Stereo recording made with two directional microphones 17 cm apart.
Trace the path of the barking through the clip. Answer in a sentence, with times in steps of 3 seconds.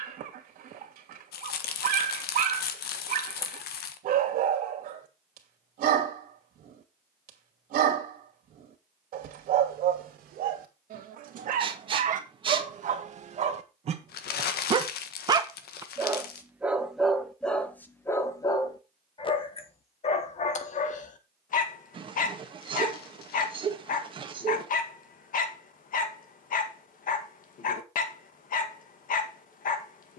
In this clip you hear the barking on the right from 0 s, in the centre from 15 s and on the left from 18 s.